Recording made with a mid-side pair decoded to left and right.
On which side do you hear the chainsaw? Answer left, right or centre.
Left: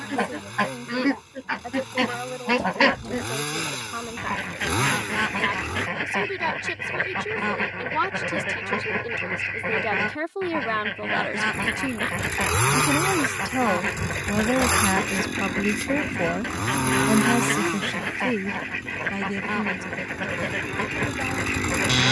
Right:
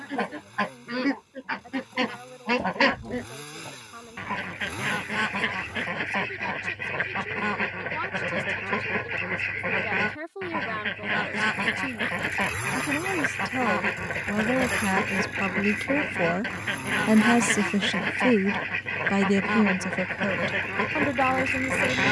left.